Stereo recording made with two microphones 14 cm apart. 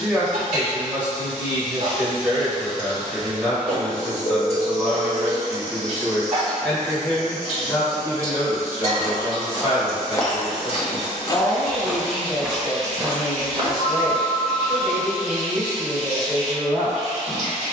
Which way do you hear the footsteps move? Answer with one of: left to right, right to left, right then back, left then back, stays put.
left then back.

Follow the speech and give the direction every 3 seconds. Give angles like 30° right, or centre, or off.
10° right, 10° right, 20° left, 30° left, centre, 10° right.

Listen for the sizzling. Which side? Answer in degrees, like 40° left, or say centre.
50° right.